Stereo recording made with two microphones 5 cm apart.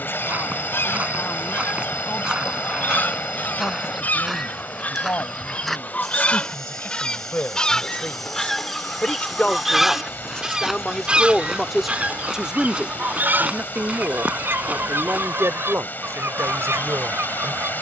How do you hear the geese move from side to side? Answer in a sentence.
In this clip you hear the geese travel towards the right.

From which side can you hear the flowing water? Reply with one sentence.
In this clip you hear the flowing water on the left.